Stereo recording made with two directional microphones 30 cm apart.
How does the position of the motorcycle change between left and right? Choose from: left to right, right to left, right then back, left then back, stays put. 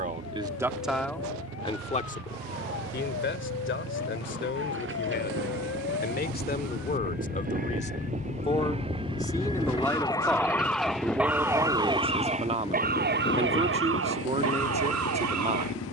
right to left.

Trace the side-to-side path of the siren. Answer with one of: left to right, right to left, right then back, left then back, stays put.
left to right.